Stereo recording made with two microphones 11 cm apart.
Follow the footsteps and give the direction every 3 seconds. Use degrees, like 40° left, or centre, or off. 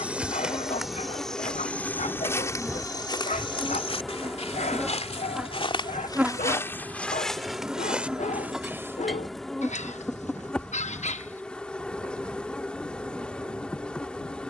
10° left, 50° left, centre, off, off.